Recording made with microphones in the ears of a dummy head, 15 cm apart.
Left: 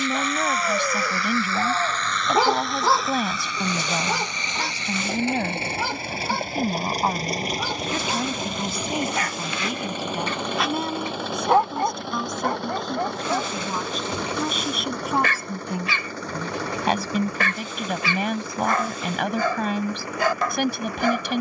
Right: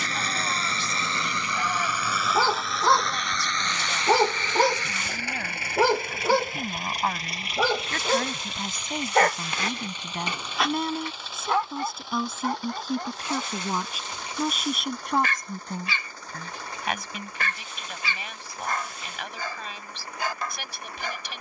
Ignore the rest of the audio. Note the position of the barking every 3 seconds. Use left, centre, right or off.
left, right, right, centre, left, left, left.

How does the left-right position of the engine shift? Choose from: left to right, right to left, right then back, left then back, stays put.
right to left.